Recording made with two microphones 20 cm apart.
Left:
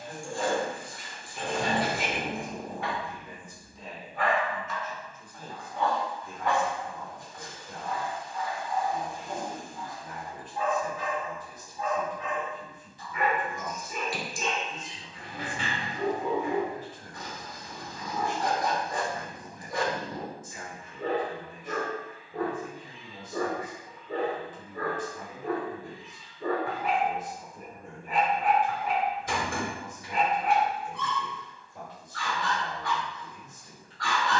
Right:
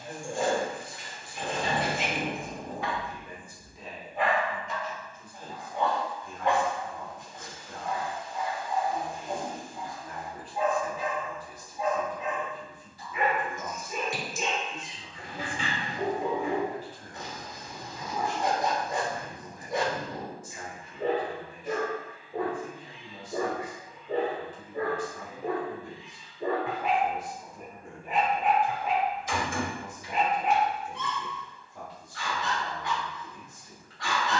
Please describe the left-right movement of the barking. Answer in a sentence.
In this clip you hear the barking stay in one place.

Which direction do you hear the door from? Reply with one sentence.
In this clip you hear the door on the left.